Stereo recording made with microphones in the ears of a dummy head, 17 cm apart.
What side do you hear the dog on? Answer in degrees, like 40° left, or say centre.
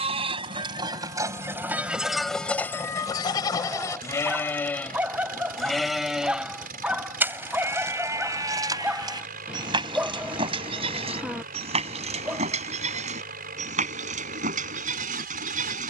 10° right.